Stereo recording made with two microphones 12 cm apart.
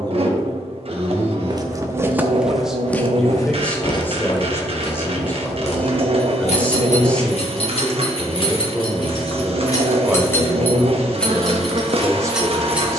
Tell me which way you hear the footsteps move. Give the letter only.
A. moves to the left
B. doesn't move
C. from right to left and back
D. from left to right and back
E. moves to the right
A.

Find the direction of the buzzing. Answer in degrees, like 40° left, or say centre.
50° right.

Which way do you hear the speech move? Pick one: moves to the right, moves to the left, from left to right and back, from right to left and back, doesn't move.
from right to left and back.